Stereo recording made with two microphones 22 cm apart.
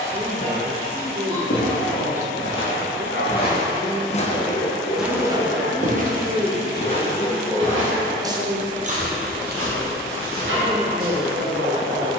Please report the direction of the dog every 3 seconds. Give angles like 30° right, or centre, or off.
70° left, 60° left, centre, 60° right.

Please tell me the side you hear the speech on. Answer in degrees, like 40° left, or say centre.
30° right.